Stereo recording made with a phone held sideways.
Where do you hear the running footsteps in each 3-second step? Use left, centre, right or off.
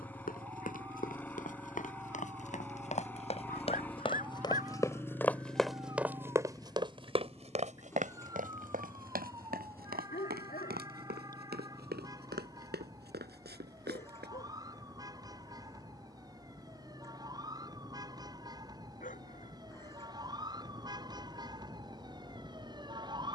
left, left, right, right, right, off, off, off.